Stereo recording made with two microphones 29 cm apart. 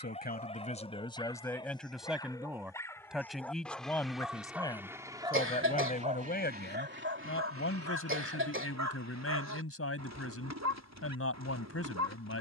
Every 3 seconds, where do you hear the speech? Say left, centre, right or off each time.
centre, centre, left, left.